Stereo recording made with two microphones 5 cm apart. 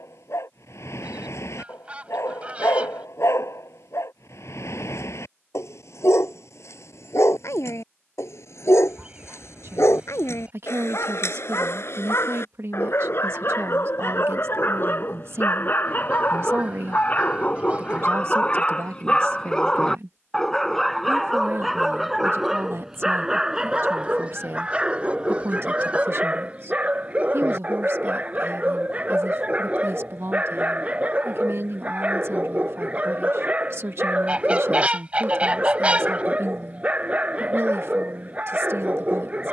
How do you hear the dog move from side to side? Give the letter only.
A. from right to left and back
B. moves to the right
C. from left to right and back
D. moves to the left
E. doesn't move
B.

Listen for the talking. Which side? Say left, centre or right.
right.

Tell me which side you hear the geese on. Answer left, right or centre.
right.